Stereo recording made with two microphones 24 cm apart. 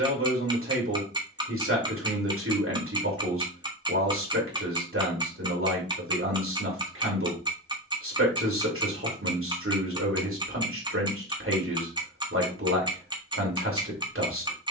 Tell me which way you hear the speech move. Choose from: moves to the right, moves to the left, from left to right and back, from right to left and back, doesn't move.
doesn't move.